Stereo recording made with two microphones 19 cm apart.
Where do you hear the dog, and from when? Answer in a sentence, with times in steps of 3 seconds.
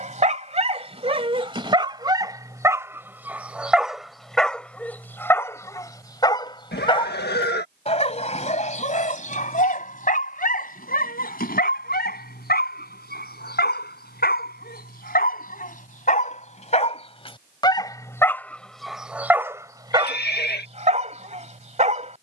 You can hear the dog on the right from 0 s, in the centre from 3 s, on the left from 6 s, in the centre from 18 s and on the right from 21 s.